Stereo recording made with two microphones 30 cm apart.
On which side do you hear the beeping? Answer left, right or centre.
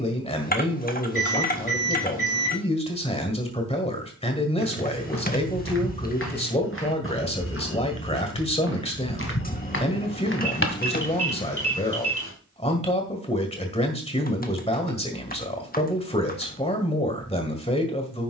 left.